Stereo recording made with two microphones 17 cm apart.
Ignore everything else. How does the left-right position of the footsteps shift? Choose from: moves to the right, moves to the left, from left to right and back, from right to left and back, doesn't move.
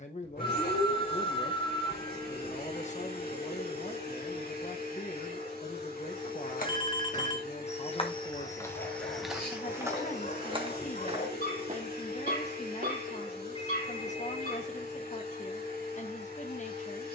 moves to the right.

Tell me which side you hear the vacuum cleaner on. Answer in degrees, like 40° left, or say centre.
70° left.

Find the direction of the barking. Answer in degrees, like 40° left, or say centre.
70° left.